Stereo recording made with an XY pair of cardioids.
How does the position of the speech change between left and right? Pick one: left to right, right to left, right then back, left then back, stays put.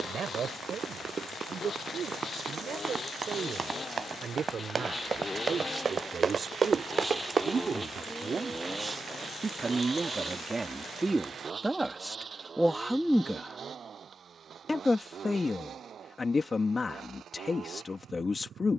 right to left.